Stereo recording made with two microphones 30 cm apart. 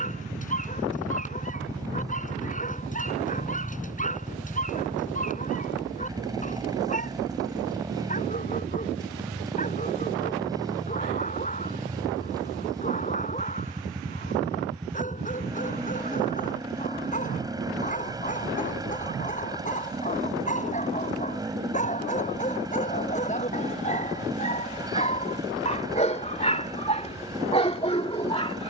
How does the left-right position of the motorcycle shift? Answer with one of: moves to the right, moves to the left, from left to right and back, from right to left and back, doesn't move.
doesn't move.